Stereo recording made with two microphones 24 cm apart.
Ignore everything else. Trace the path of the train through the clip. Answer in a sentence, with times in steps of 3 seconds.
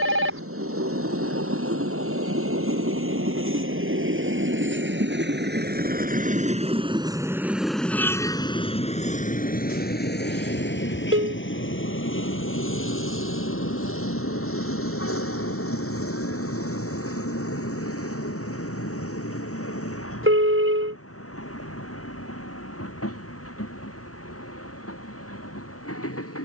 In this clip you hear the train on the right from 0 s, in the centre from 6 s and on the left from 9 s.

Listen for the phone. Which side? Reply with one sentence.
In this clip you hear the phone on the right.